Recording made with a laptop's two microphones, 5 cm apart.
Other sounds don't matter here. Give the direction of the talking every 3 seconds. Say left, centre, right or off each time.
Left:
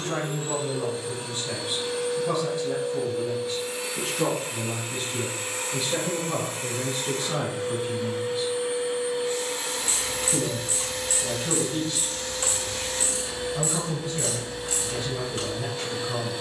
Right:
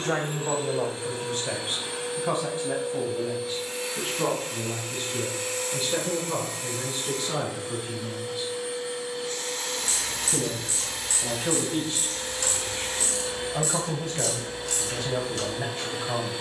right, centre, centre, right, right, right.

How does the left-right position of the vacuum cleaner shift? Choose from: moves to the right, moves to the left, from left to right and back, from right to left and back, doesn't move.
from right to left and back.